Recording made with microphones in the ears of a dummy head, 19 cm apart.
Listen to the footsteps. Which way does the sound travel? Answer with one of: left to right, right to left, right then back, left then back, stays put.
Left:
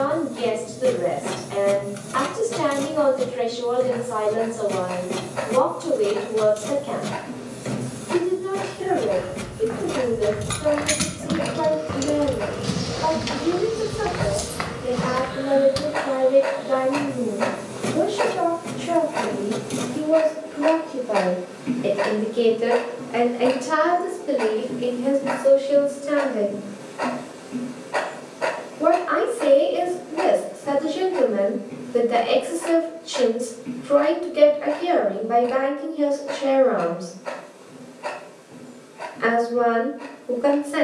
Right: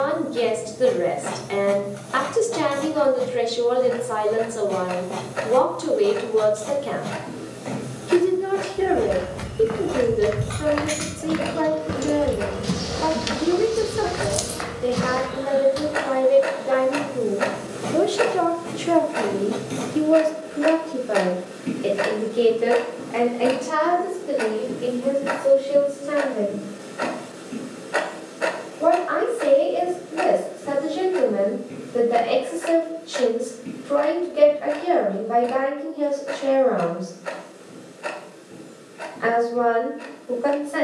right to left.